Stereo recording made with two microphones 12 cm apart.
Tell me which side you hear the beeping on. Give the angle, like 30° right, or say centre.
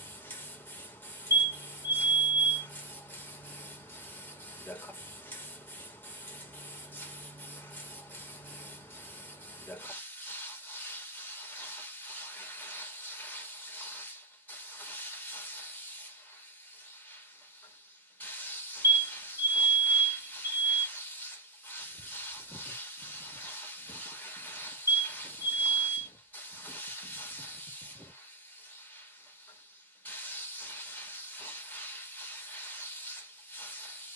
30° right.